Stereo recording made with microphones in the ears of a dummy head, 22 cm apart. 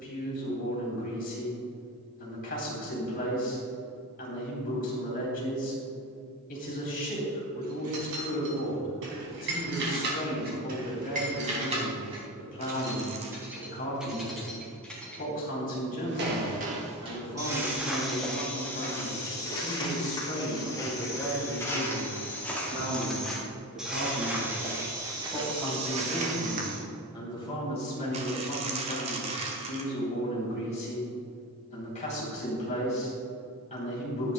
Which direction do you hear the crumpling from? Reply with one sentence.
You can hear the crumpling on the right.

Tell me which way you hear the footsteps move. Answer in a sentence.
You can hear the footsteps move from right to left and back again.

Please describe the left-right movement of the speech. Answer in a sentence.
In this clip you hear the speech go right and come back.